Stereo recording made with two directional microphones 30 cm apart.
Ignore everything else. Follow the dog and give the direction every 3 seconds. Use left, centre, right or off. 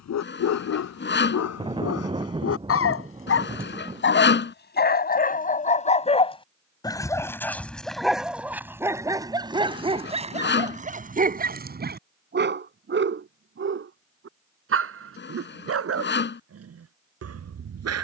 left, left, centre, right, right, right.